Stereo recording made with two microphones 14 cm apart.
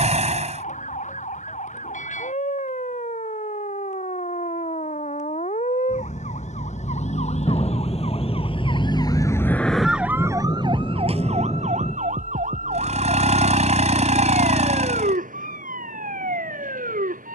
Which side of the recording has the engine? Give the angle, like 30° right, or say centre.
60° right.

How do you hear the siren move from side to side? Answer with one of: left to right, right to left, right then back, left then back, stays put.
left to right.